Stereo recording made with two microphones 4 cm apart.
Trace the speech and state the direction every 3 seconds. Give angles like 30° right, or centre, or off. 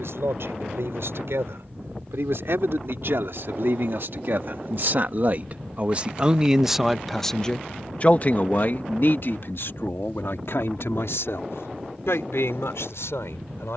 70° right, 50° right, 10° left, 60° left, 80° left.